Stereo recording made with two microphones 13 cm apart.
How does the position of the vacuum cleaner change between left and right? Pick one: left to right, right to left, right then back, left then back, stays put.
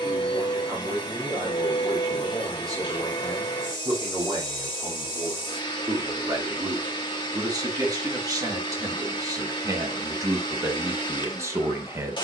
stays put.